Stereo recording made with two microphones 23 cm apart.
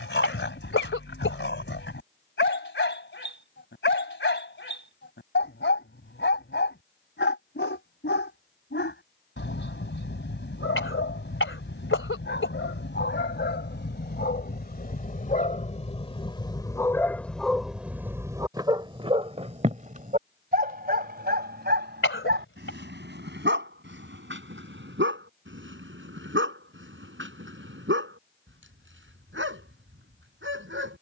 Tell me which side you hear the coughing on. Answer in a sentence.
In this clip you hear the coughing on the left.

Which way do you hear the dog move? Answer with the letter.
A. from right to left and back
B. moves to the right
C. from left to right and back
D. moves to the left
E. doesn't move
B.